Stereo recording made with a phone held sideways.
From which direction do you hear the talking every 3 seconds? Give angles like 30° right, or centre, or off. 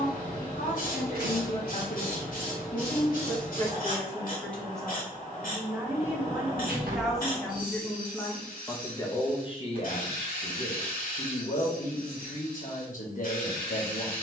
60° left, 10° left, 10° left, 50° left, 60° left.